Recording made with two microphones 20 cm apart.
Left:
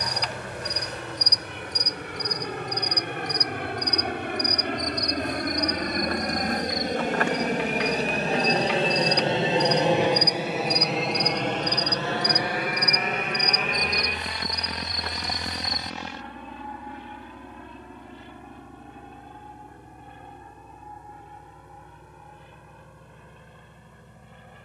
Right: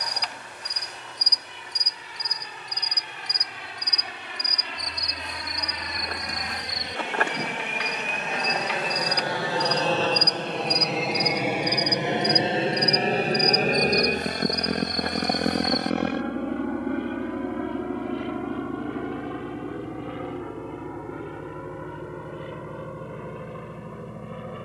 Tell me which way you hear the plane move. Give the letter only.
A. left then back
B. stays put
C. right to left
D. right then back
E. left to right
E.